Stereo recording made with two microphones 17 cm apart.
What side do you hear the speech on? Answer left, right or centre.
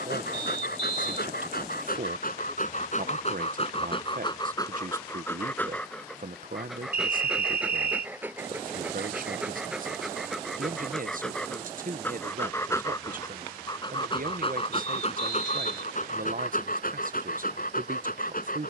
right.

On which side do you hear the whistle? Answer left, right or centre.
right.